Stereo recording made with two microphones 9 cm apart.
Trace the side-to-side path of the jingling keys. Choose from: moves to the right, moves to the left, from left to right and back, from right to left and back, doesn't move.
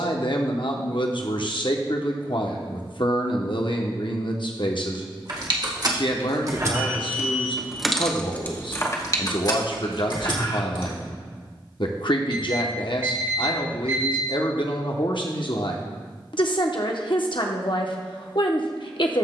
moves to the left.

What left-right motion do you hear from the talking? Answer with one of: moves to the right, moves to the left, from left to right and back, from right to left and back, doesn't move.
doesn't move.